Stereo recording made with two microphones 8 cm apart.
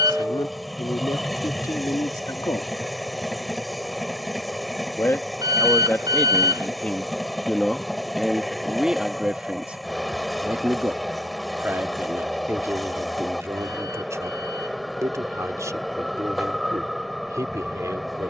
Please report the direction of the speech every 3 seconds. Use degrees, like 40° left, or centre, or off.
60° left, 30° left, 10° left, 20° right, 40° right, 50° right.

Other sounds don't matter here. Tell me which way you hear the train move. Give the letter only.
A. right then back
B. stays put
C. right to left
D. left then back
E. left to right
B.